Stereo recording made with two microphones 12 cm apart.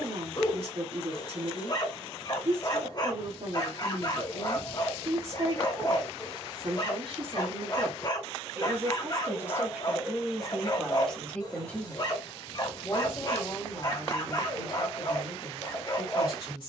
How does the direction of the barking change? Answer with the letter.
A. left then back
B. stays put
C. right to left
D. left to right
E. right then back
B.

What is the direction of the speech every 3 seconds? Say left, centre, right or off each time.
right, right, right, centre, left, left.